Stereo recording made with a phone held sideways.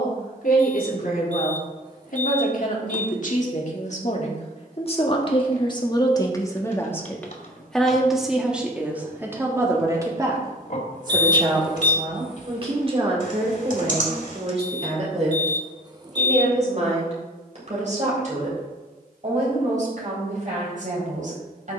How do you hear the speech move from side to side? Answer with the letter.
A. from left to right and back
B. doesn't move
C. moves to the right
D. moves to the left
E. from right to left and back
C.